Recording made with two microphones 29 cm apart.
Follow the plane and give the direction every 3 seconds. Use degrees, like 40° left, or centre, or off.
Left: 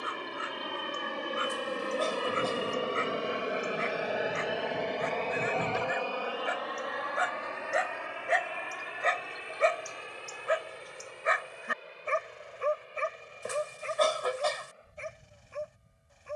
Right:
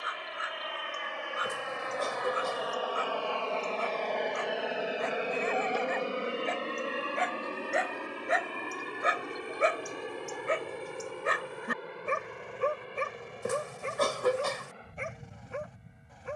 50° left, centre, 40° right, 50° right, 60° right, 60° right.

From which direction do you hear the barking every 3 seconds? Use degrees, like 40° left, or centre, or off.
30° left, 20° left, centre, 30° right, 60° right, 80° right.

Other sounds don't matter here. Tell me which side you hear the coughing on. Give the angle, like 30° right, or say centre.
50° right.